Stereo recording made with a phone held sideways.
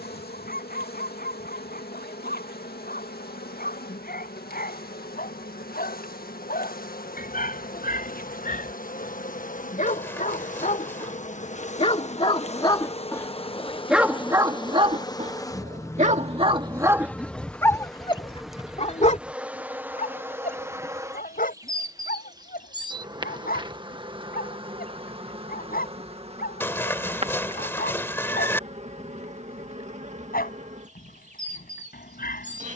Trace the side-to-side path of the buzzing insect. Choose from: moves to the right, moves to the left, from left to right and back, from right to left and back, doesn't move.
moves to the right.